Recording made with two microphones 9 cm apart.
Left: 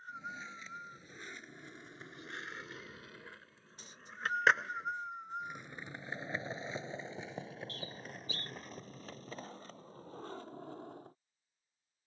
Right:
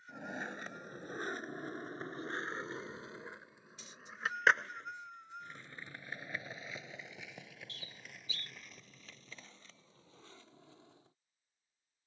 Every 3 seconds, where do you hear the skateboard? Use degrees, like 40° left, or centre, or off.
50° right, centre, 30° left, 50° left.